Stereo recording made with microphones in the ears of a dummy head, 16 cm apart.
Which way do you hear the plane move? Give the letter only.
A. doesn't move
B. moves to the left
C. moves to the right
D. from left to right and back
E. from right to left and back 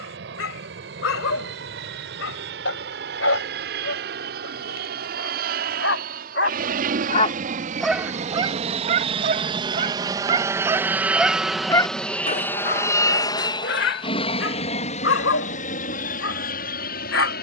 B.